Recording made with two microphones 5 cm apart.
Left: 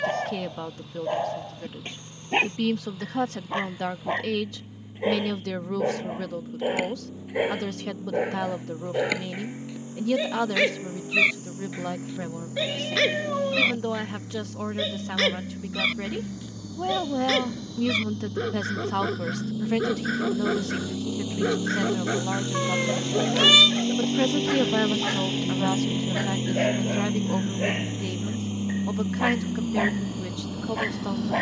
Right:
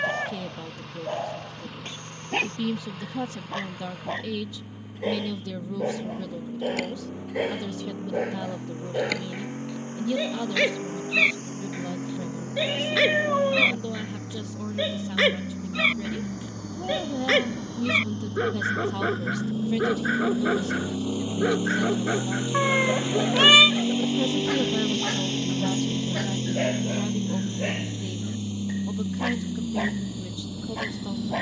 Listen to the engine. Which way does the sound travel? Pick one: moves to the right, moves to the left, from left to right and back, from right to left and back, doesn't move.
moves to the left.